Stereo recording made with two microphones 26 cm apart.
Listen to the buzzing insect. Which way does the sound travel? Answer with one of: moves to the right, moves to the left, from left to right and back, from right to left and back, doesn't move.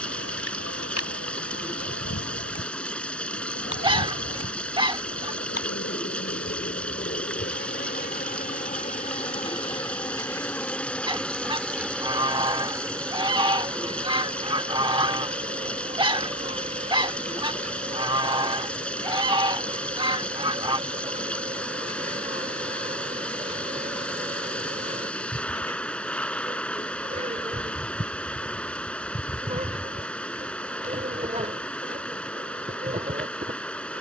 moves to the right.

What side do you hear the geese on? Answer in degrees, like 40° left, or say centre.
20° right.